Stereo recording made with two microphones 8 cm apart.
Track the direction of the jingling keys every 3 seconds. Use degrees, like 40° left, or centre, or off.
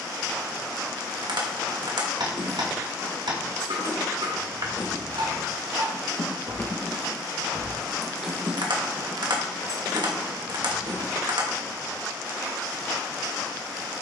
70° left, 60° left, 10° left, 50° right, off.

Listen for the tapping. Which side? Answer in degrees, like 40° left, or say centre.
70° right.